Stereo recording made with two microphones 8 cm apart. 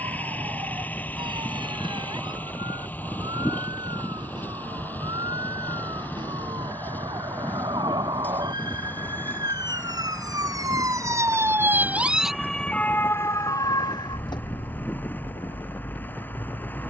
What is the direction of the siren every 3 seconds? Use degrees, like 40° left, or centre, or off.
70° right, 70° right, 70° right, 50° right, 40° left, 80° left.